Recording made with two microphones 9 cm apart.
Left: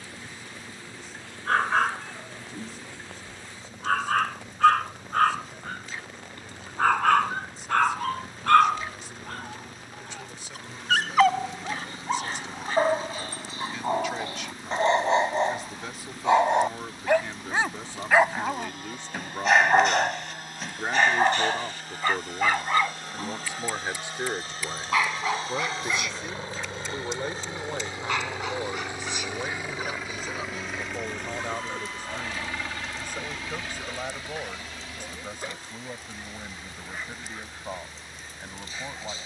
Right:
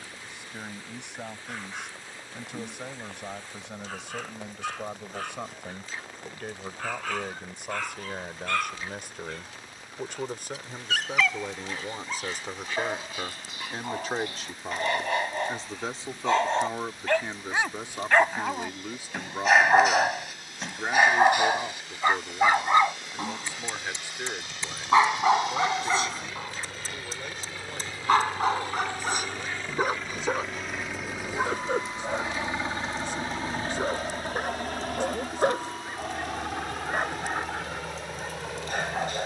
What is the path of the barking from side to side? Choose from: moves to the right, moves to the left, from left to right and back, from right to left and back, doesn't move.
moves to the right.